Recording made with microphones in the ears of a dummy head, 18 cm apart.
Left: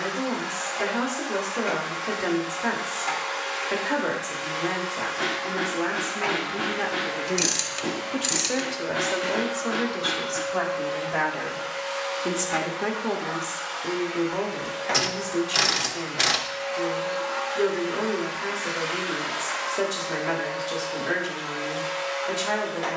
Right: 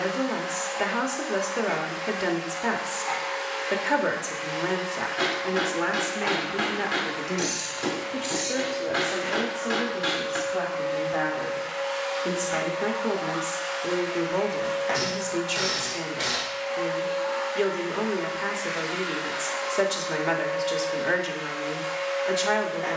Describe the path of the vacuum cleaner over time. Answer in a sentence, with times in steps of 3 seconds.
You can hear the vacuum cleaner on the left from 0 s, in the centre from 12 s and on the left from 15 s.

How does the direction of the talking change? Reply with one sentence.
In this clip you hear the talking move from right to left and back again.